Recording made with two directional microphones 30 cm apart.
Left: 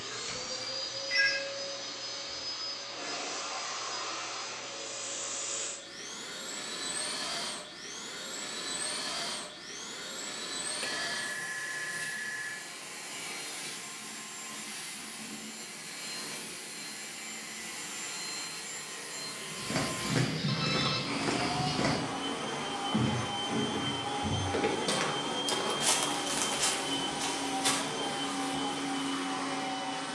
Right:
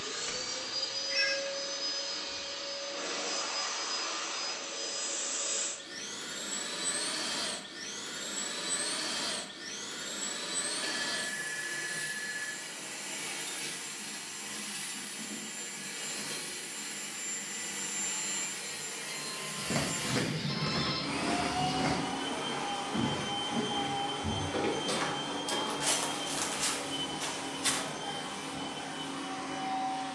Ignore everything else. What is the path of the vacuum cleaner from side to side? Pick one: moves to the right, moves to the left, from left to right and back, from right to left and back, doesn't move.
moves to the left.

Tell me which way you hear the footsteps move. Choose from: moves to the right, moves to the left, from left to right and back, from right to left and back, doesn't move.
from right to left and back.